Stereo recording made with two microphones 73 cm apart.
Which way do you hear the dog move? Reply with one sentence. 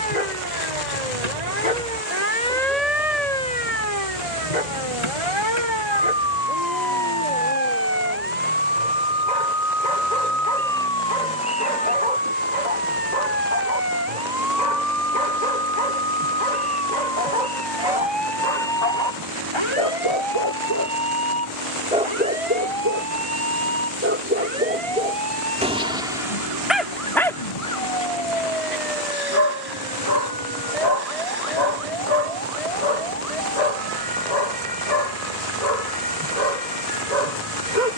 In this clip you hear the dog go right and come back.